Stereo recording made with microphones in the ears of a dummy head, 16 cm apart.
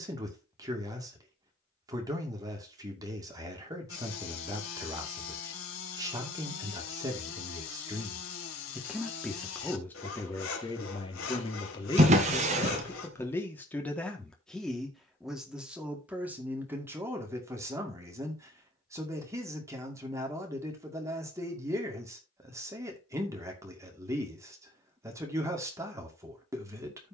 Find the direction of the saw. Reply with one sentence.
In this clip you hear the saw on the left.